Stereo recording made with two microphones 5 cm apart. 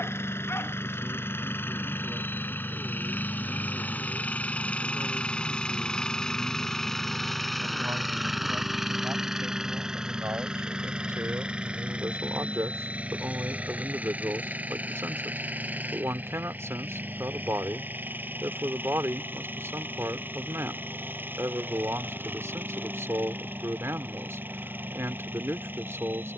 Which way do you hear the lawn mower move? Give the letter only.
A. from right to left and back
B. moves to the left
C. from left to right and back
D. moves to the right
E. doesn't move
D.